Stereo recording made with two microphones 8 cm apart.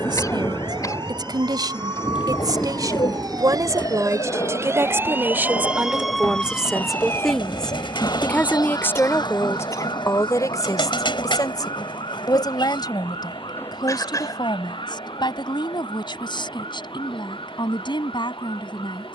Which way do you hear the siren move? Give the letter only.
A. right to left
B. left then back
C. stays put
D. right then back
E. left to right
A.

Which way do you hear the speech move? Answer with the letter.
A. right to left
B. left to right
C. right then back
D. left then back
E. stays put
A.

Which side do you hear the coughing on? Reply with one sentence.
In this clip you hear the coughing on the left.